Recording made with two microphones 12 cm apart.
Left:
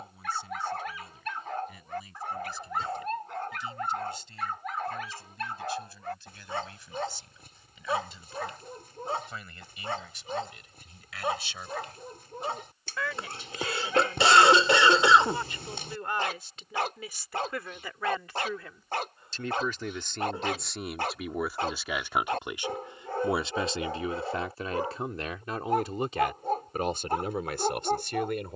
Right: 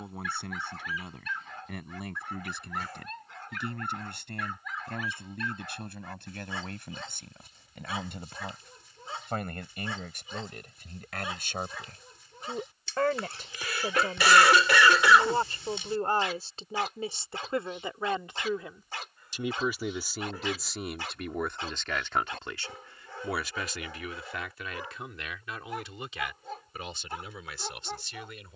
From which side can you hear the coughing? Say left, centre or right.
left.